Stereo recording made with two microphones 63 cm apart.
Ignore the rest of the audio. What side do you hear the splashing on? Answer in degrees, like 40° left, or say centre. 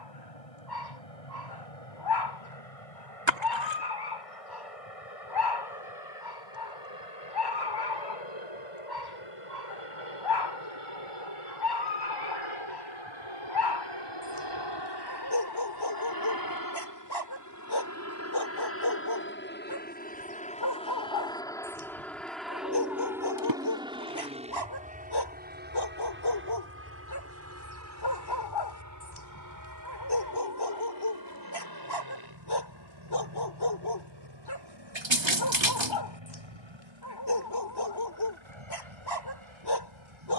50° right.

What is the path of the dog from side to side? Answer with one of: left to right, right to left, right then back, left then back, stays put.
stays put.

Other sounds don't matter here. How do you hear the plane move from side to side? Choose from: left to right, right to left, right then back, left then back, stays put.
left to right.